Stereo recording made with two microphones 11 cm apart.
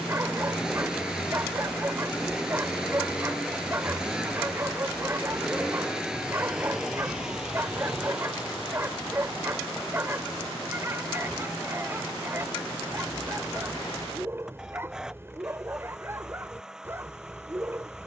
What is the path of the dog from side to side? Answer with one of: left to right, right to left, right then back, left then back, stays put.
stays put.